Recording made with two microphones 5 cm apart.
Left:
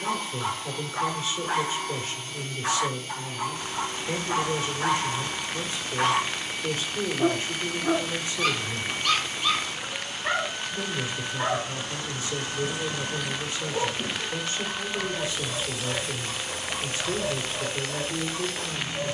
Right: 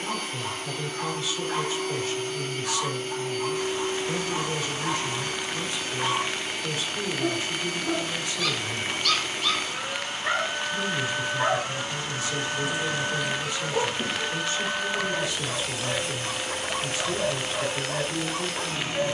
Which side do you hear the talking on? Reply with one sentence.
In this clip you hear the talking on the left.